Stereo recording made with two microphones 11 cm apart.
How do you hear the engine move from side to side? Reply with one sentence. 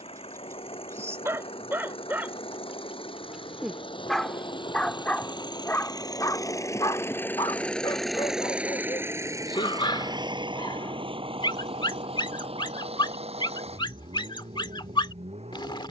You can hear the engine move from left to right.